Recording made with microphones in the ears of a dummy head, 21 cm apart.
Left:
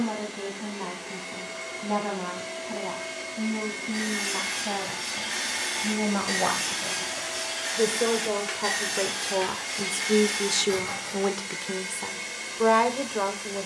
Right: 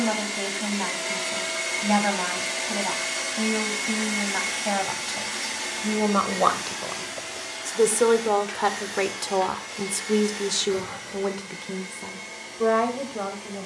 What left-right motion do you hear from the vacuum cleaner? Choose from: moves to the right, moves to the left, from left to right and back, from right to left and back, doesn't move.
moves to the left.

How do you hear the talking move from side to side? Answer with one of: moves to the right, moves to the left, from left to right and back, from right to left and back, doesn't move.
moves to the left.